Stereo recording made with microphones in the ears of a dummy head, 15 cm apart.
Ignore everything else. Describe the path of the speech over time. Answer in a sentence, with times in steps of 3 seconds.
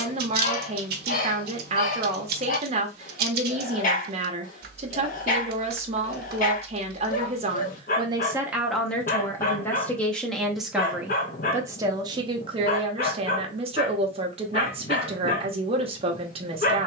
In this clip you hear the speech on the right from 0 s, in the centre from 9 s and on the right from 12 s.